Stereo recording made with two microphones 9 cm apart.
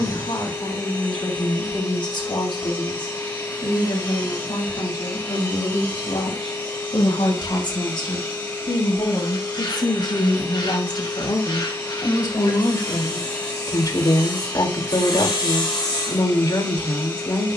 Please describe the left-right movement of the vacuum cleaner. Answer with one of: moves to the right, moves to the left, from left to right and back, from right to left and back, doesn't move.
doesn't move.